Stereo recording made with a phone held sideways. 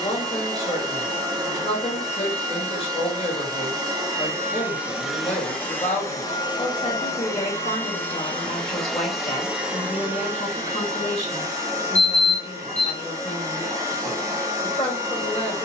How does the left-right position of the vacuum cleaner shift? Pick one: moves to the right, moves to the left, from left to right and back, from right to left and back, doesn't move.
from right to left and back.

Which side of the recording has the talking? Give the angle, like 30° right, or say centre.
40° left.